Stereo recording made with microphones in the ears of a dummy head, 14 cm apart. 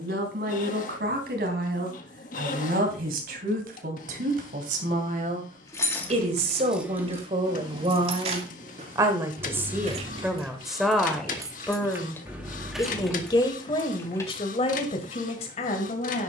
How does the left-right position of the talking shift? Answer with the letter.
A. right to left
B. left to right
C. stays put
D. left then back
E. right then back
A.